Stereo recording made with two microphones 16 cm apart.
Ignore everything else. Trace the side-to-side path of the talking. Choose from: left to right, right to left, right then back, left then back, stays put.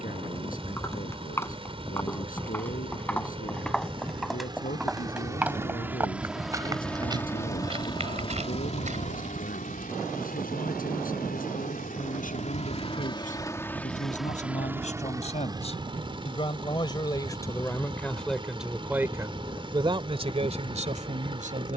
left to right.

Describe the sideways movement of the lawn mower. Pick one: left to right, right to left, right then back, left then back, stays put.
left then back.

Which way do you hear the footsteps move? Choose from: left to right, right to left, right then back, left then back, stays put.
left to right.